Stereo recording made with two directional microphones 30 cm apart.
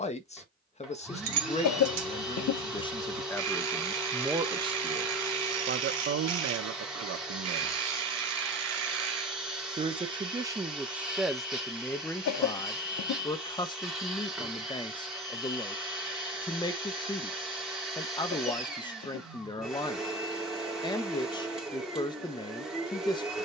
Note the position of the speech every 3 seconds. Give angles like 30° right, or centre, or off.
20° left, 10° right, 50° right, 10° right, 10° left, 10° left, 10° left, 10° left.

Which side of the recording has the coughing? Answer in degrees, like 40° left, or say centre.
60° left.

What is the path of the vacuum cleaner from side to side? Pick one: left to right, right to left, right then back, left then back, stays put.
stays put.